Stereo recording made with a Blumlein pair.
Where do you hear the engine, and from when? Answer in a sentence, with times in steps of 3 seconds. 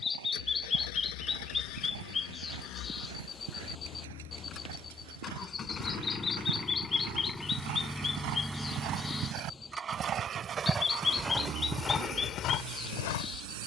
You can hear the engine on the left from 0 s, in the centre from 6 s and on the right from 9 s.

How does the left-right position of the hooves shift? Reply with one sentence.
You can hear the hooves go from the right side to the left.